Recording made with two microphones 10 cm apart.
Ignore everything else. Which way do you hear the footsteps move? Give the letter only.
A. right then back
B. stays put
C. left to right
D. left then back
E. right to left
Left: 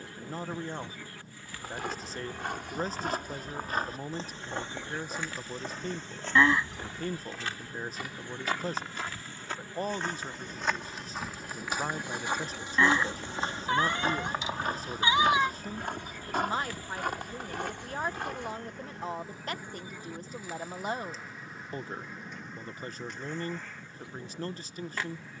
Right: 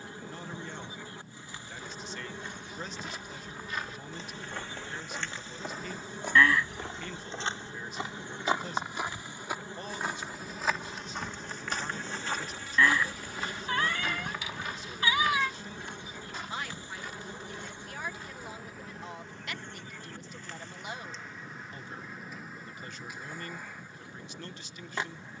A.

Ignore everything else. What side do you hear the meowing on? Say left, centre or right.
left.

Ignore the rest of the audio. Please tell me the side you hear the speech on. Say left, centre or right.
left.